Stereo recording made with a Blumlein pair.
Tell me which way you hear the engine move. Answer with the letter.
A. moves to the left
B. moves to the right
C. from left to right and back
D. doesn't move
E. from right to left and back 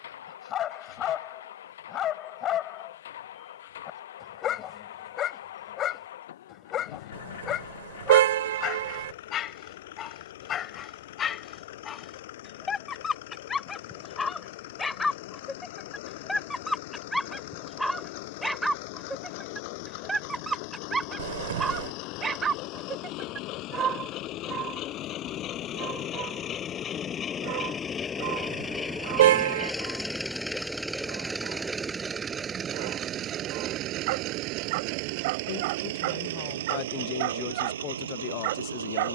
B.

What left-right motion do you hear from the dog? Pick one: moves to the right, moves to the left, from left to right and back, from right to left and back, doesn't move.
moves to the right.